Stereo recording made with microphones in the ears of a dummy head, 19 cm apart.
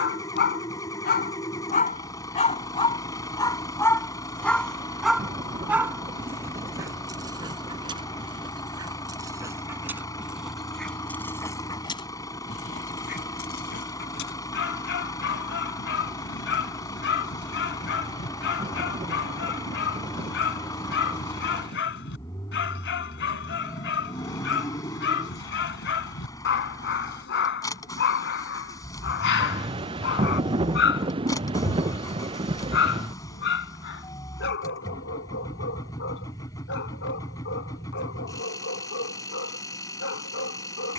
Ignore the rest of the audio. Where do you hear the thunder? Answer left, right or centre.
right.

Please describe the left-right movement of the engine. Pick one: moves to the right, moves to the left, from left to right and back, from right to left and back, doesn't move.
doesn't move.